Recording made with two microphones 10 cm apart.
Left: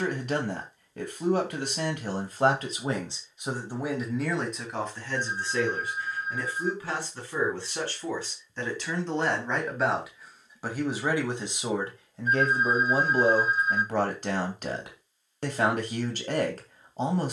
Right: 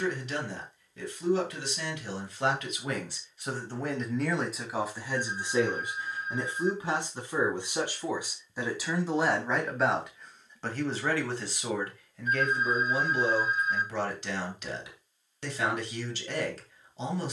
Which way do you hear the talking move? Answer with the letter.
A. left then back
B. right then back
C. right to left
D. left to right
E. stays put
B.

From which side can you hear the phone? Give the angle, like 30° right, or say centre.
30° left.